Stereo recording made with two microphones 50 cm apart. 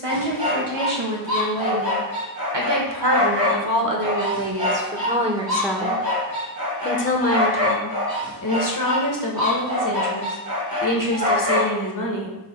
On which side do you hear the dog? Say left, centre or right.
right.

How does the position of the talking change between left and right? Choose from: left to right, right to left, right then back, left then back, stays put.
right to left.